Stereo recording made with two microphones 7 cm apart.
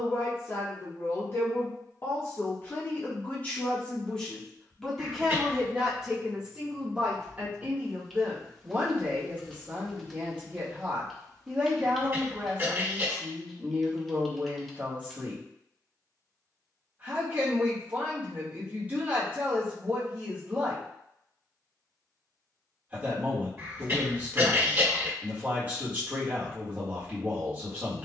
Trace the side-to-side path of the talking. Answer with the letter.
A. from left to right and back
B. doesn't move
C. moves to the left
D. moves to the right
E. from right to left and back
D.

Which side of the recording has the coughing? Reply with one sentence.
You can hear the coughing on the right.